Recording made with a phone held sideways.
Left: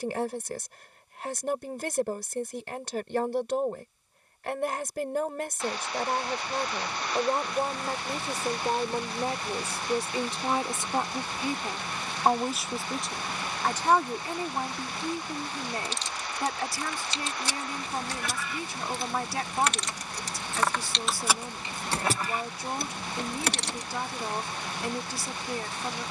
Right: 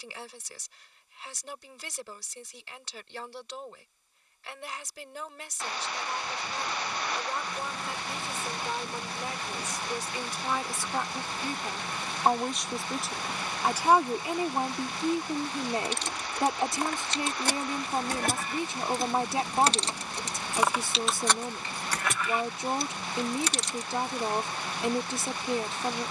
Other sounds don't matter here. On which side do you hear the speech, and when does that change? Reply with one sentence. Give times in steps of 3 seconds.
In this clip you hear the speech on the left from 0 s, in the centre from 12 s and on the right from 15 s.